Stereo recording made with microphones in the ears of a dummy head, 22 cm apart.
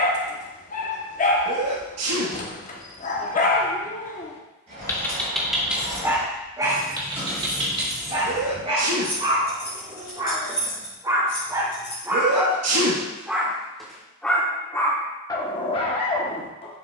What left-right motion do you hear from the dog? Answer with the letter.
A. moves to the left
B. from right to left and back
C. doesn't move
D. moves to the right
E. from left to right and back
E.